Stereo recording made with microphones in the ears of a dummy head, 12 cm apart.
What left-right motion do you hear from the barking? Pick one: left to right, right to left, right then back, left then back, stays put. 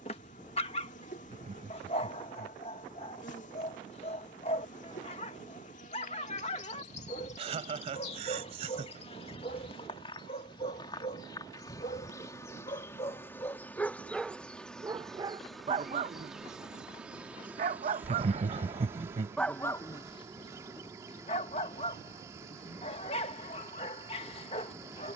right then back.